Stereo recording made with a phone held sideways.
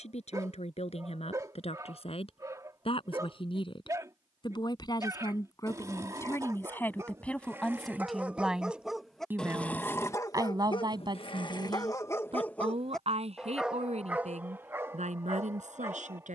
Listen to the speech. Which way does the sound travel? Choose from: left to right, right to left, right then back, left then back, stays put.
left to right.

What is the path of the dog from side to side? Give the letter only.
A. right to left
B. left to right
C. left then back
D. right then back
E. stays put
C.